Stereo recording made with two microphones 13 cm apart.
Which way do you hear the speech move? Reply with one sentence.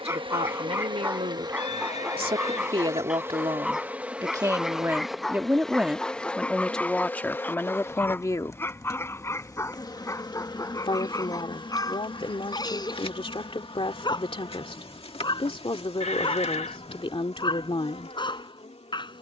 You can hear the speech move to the left.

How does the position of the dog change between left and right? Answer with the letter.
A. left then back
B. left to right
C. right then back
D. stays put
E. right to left
E.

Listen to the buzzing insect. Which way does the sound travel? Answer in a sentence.
In this clip you hear the buzzing insect move to the left.